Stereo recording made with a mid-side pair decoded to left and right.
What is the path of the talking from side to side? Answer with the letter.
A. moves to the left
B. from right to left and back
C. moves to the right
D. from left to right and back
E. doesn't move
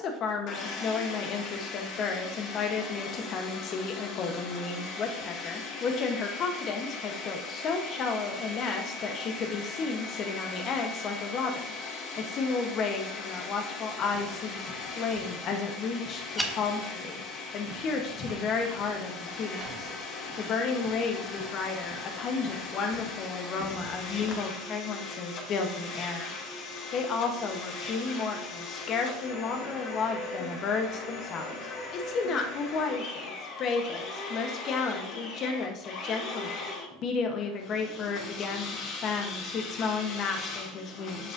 E.